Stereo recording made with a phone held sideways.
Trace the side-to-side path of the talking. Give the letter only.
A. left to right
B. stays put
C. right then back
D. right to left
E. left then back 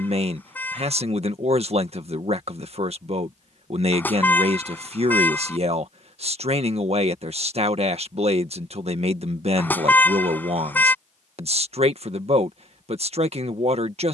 B.